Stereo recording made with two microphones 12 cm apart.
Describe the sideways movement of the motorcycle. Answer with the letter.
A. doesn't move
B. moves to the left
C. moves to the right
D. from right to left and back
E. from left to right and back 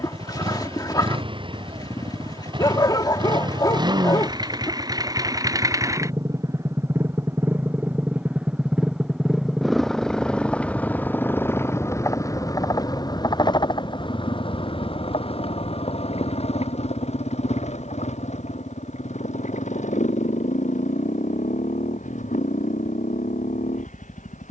B.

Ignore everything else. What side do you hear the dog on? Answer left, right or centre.
left.